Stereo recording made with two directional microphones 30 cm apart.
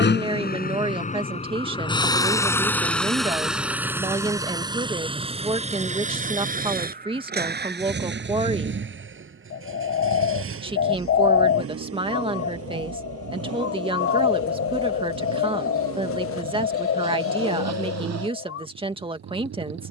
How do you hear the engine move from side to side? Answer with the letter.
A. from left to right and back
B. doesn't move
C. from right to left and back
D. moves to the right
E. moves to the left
D.